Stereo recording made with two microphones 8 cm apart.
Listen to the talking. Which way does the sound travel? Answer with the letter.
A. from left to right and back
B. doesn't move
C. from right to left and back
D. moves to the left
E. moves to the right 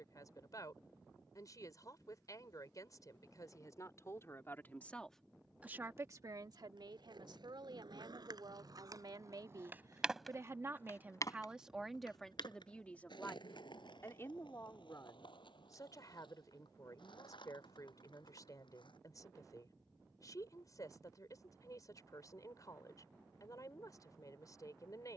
A.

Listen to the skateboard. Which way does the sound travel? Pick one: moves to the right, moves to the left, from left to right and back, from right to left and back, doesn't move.
moves to the left.